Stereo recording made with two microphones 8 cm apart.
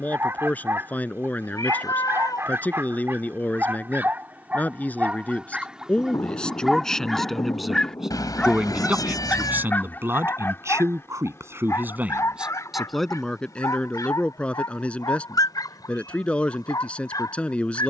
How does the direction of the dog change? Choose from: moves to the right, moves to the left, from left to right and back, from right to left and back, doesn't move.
moves to the left.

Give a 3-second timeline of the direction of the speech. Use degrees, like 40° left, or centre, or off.
20° left, 20° left, centre, 30° right, 10° left, 20° left.